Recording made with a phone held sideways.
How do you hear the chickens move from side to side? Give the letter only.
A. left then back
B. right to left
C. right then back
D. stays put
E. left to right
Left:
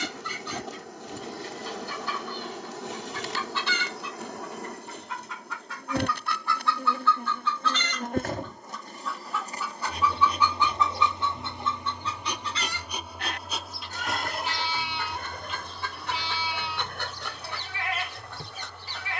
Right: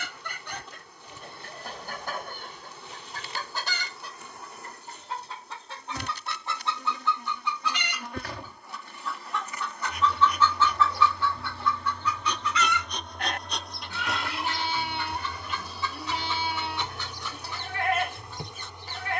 B.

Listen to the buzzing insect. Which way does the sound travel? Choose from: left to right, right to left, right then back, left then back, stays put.
left to right.